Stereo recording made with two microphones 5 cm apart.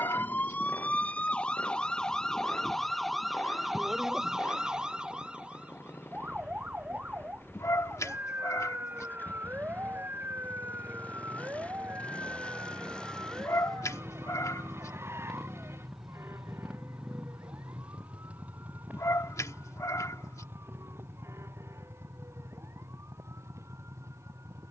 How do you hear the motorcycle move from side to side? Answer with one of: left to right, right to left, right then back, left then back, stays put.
left to right.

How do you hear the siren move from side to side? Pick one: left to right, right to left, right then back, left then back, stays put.
left to right.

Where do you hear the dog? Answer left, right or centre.
left.